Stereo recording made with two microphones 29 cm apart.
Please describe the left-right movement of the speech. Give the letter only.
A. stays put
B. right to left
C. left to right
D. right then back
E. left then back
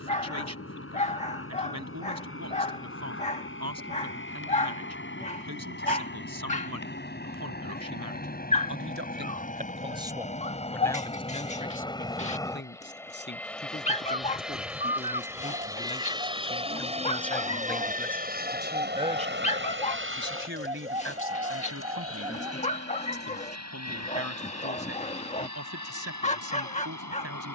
E.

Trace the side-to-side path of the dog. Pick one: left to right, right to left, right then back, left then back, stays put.
stays put.